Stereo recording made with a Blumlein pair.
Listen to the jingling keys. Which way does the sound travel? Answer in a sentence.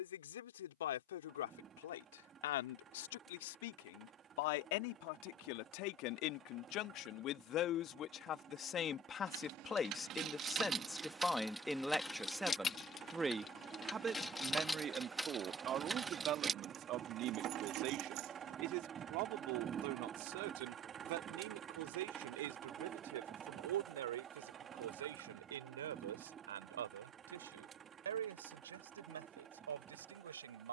In this clip you hear the jingling keys go left and come back.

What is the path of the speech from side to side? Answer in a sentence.
In this clip you hear the speech go from the left side to the right.